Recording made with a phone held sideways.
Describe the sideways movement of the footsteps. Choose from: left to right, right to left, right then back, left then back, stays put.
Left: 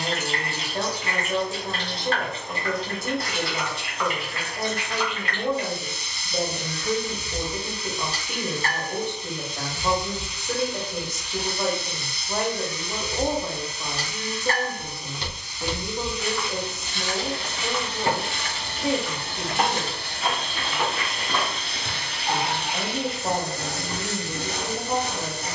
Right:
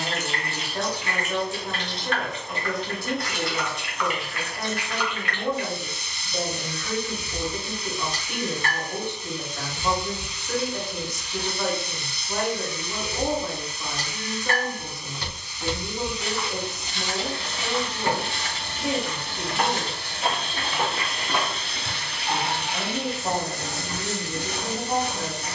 right then back.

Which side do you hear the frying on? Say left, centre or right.
left.